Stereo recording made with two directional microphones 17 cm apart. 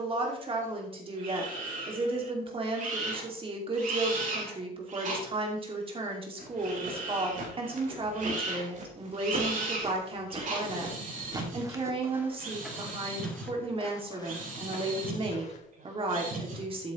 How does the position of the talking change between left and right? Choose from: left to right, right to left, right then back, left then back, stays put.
stays put.